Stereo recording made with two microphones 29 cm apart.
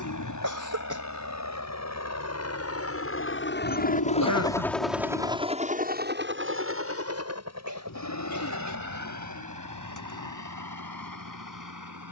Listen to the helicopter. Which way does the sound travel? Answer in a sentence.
You can hear the helicopter go from the left side to the right.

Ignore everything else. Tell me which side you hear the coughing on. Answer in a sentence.
You can hear the coughing on the right.